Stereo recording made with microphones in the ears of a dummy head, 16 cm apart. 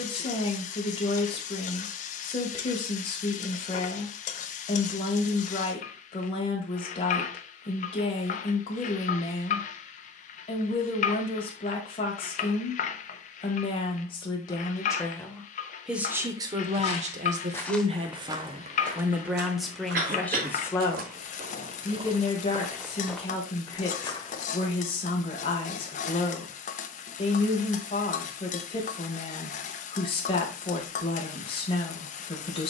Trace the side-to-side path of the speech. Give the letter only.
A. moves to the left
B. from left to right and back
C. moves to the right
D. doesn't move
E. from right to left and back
B.